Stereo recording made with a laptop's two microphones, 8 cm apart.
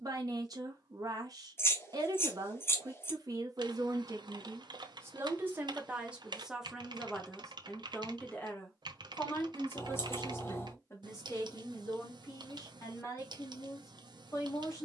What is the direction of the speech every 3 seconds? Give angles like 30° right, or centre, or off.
50° right, 40° right, centre, 40° left, 50° left.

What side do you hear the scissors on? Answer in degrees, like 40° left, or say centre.
30° left.